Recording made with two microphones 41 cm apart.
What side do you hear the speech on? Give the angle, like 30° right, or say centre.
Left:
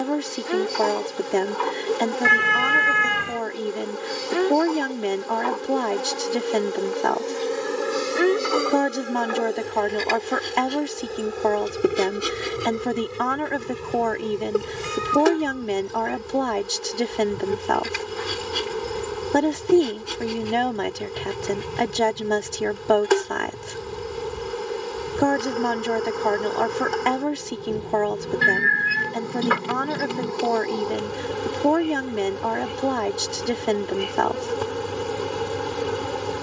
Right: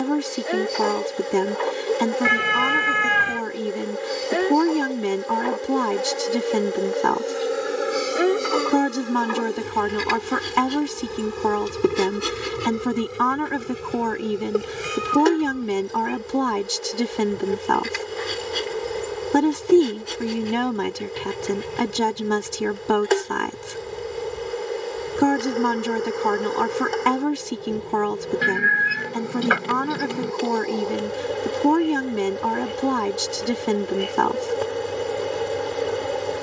20° right.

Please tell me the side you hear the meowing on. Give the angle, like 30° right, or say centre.
centre.